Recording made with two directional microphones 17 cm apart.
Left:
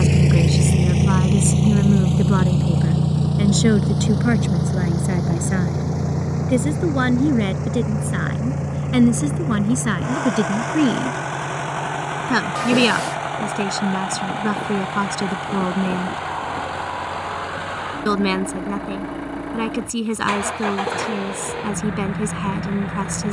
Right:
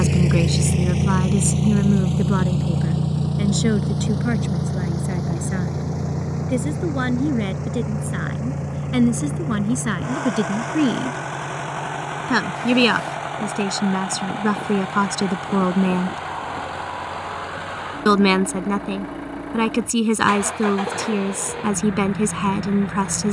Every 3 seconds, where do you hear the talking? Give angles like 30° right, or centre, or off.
centre, 20° left, 20° left, 10° left, 10° right, 20° right, 30° right, 30° right.